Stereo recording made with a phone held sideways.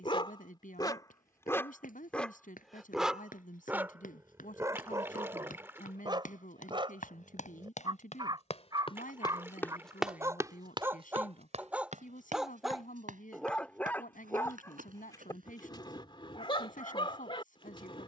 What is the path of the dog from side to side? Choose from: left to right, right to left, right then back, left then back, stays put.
right then back.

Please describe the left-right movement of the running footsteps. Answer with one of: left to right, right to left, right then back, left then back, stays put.
left to right.